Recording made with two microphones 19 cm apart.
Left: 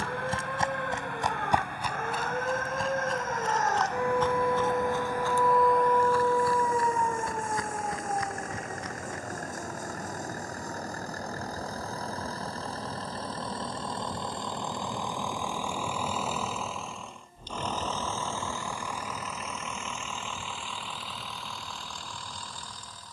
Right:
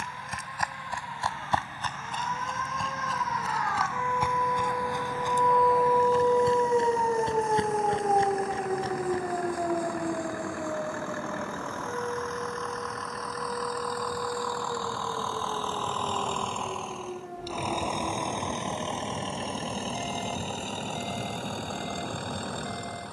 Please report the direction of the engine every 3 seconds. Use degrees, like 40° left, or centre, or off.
60° left, 50° left, 50° left, 40° left, 30° left, centre, 30° right, 50° right.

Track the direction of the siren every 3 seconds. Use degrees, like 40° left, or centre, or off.
60° left, 30° left, 40° right, 70° right, 70° right, 80° right, 80° right, 80° right.